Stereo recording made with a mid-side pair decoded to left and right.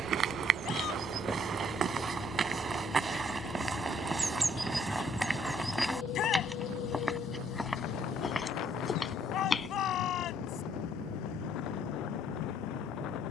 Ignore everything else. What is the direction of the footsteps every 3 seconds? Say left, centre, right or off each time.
right, centre, centre, left, off.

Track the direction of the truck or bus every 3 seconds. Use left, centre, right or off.
centre, left, left, left, left.